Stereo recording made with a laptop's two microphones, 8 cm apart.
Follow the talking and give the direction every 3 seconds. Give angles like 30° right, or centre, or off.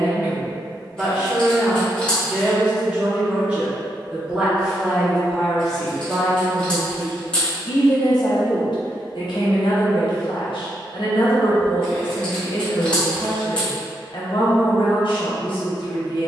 20° right, 10° right, 40° left, 70° left, 70° left, 70° left.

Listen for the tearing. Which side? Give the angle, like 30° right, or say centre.
10° left.